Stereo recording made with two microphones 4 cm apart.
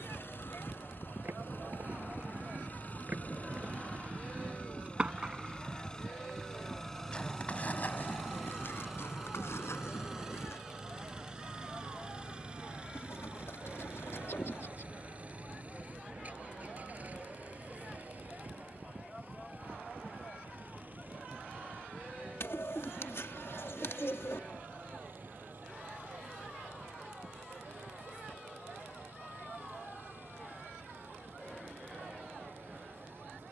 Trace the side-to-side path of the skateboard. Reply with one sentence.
In this clip you hear the skateboard move to the left.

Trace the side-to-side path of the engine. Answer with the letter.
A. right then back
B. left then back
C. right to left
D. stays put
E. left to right
E.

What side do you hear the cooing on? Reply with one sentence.
In this clip you hear the cooing on the left.